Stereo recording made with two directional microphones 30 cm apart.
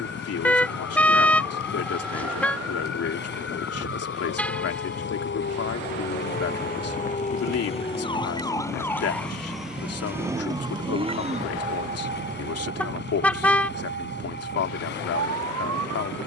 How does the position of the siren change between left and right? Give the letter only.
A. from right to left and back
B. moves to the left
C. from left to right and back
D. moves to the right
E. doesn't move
D.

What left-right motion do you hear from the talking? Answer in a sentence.
You can hear the talking stay put.